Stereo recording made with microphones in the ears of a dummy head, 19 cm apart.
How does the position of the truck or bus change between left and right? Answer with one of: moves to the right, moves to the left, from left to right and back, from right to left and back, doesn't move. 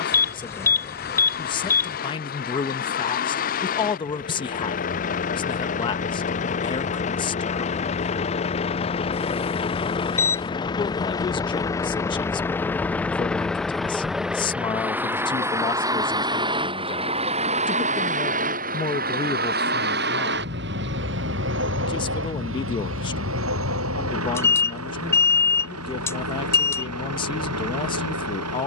moves to the right.